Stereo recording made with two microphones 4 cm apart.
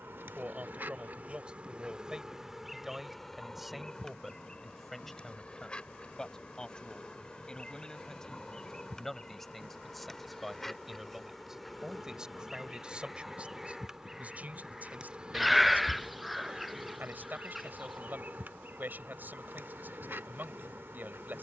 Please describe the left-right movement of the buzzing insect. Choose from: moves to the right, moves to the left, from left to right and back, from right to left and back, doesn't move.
from right to left and back.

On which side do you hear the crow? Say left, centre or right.
centre.